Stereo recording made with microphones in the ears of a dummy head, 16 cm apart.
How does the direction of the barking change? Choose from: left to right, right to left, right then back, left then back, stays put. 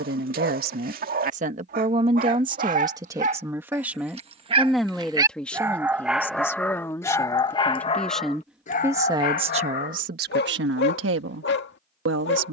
right to left.